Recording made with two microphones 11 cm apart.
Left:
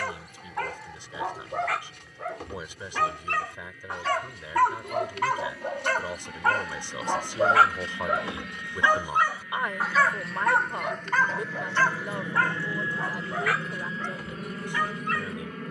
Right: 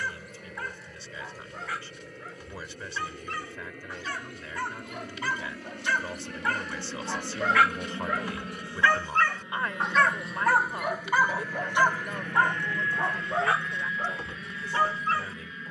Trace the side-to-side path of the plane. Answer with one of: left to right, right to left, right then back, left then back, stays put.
right to left.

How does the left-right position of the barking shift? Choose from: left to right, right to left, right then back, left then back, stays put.
left to right.